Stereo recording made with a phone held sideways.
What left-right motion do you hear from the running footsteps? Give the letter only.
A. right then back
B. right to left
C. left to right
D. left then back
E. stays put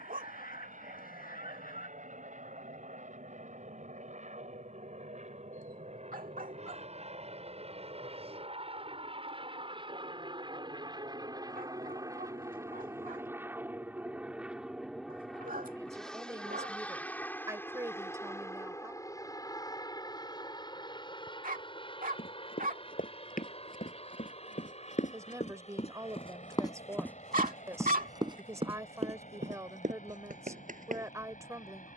C.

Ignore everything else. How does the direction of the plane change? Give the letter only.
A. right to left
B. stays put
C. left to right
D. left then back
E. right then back
A.